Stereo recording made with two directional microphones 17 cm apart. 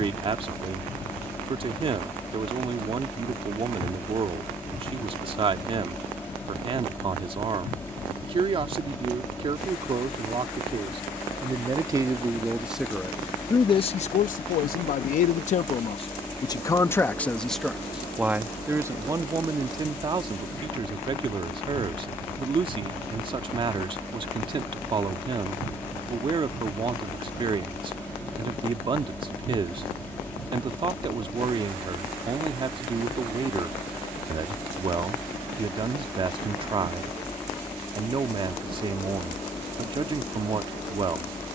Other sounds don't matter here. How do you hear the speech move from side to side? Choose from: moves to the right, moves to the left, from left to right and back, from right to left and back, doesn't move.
from right to left and back.